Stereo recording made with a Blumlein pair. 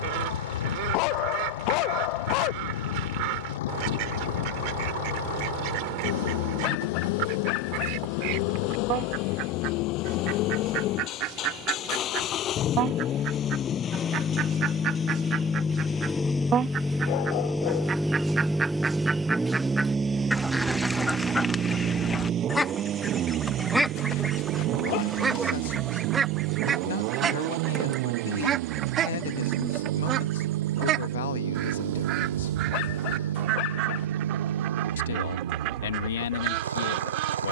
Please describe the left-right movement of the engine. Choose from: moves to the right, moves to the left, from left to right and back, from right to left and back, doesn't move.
moves to the right.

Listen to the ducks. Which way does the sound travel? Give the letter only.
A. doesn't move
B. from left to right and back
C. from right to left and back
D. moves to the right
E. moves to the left
C.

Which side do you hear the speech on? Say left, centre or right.
left.